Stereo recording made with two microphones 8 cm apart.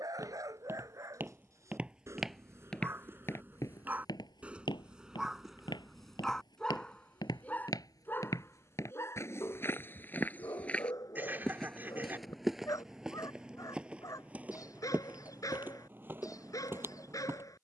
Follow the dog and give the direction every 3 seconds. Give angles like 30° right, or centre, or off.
40° right, 10° right, 20° left, 40° left, 50° left, 50° left.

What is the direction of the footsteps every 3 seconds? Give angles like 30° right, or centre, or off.
20° right, 60° left, 50° left, 20° left, 10° right, 30° right.